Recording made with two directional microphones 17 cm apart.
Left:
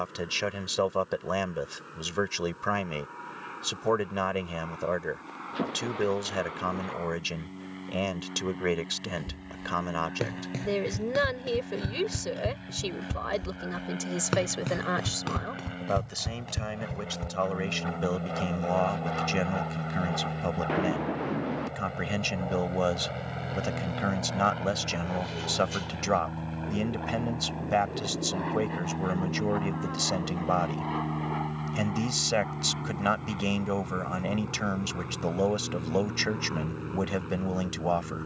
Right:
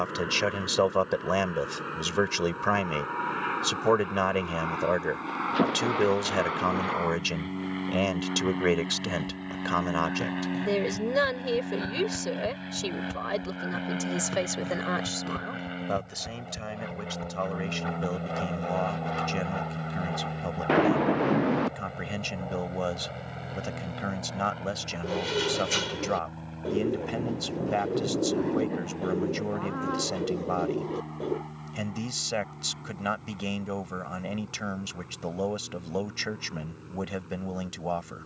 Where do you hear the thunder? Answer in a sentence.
You can hear the thunder on the right.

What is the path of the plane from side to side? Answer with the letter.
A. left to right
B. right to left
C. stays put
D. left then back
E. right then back
B.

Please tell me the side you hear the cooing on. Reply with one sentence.
In this clip you hear the cooing on the right.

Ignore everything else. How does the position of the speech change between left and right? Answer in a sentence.
In this clip you hear the speech go from the right side to the left.